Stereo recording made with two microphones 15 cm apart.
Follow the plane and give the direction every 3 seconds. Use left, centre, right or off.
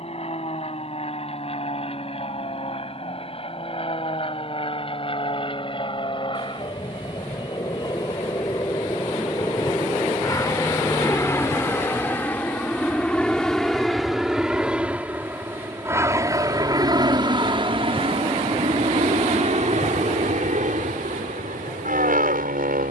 left, left, left, left, centre, right, right, right.